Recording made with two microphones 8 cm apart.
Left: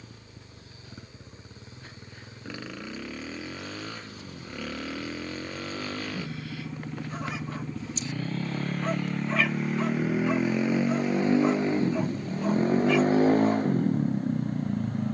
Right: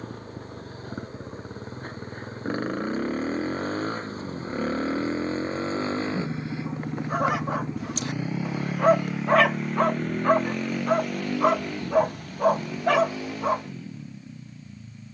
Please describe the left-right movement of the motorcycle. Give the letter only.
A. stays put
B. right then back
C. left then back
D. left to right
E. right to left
E.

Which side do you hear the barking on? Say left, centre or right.
right.